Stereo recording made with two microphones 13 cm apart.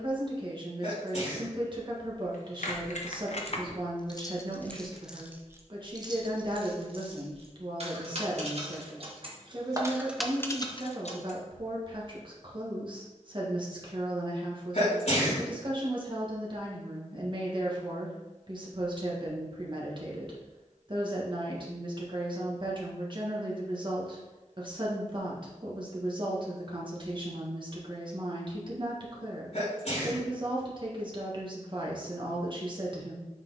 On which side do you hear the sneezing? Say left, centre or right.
left.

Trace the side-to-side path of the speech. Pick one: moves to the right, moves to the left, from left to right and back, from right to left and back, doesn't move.
doesn't move.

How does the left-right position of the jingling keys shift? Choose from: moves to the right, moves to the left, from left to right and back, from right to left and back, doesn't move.
from left to right and back.